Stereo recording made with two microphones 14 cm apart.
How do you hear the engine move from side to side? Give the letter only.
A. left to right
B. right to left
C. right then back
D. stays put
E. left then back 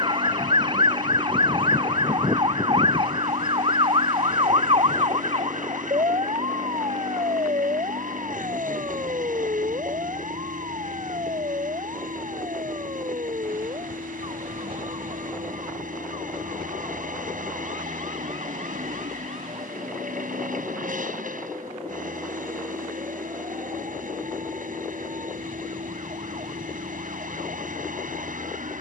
D.